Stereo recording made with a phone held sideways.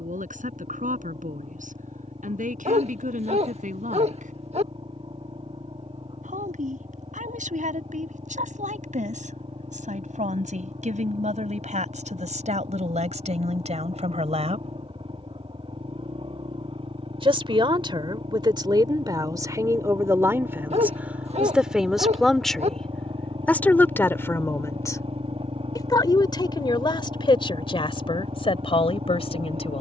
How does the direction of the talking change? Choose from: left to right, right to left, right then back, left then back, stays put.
right to left.